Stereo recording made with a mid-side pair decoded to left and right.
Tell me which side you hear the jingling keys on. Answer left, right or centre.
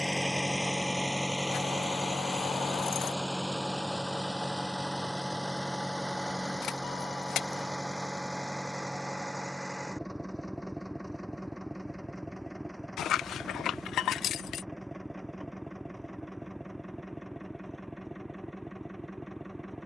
left.